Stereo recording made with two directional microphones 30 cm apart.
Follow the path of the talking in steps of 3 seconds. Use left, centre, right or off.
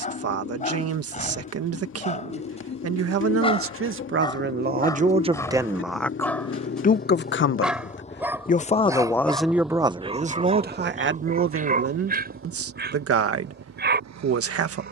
right, right, left, right, right.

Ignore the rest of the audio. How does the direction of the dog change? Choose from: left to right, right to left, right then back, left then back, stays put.
left to right.